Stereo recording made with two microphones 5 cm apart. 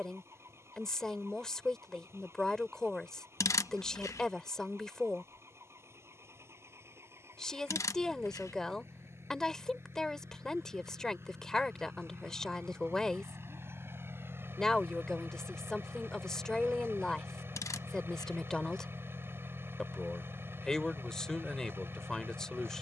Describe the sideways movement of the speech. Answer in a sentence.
In this clip you hear the speech stay in one place.